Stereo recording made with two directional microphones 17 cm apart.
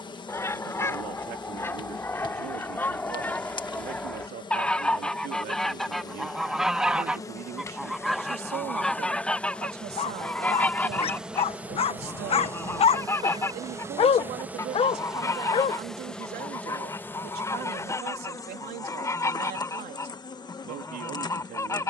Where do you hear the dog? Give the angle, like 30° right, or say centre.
40° left.